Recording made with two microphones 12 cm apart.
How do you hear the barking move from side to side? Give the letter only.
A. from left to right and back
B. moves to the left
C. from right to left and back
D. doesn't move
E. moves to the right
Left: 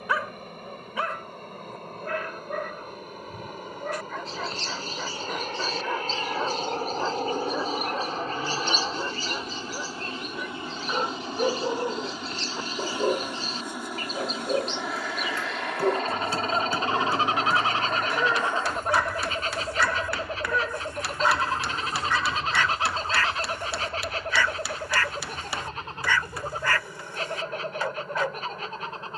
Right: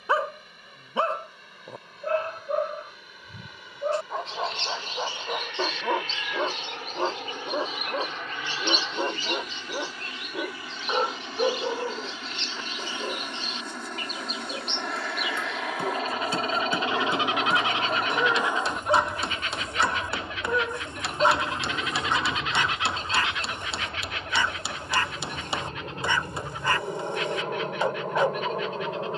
C.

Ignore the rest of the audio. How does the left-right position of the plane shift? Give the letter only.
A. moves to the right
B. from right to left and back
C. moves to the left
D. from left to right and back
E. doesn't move
A.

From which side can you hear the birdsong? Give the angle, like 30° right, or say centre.
40° left.